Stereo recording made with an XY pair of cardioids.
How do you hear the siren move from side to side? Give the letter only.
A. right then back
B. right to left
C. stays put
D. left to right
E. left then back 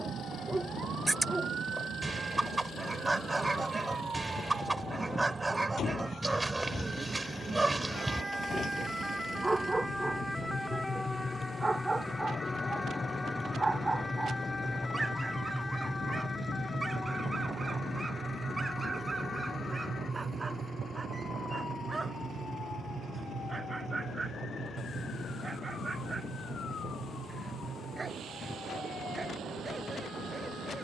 B.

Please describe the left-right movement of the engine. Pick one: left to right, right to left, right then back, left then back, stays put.
left to right.